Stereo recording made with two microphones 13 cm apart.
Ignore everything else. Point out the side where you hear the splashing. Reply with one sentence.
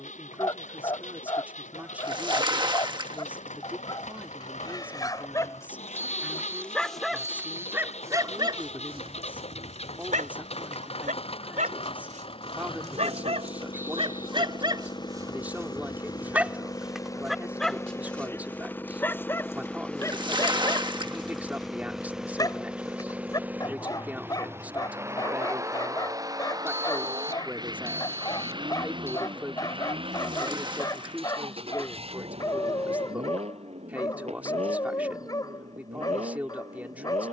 In this clip you hear the splashing on the right.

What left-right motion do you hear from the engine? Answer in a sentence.
You can hear the engine travel towards the right.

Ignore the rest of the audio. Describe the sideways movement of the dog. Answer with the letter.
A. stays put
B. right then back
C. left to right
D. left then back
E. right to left
B.